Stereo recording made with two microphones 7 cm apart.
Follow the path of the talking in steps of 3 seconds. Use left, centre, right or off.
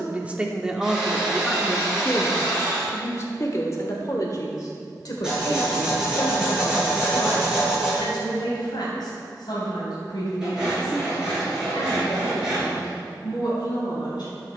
centre, left, left, left, left.